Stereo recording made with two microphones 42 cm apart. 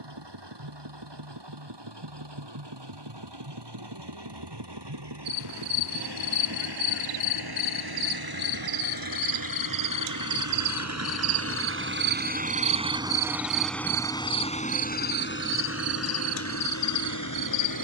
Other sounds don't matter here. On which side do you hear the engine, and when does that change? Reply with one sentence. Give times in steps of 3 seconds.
You can hear the engine on the right from 0 s, in the centre from 12 s and on the left from 15 s.